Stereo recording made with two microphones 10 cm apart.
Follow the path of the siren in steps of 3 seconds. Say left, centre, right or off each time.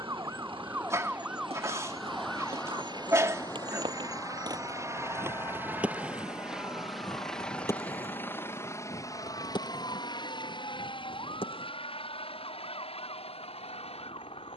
centre, left, left, left, left.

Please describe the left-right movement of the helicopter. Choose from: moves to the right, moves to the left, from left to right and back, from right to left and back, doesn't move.
moves to the left.